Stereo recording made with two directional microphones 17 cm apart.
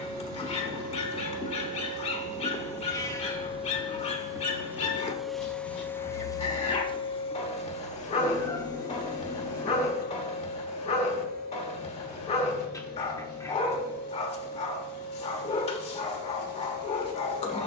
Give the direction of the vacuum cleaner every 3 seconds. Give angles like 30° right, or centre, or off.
50° right, 10° right, 40° left, 60° left, 70° left, 70° left.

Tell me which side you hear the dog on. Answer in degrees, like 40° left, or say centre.
40° left.